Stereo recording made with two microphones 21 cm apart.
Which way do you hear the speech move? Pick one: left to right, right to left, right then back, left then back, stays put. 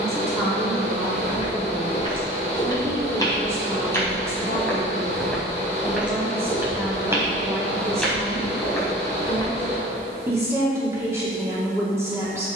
stays put.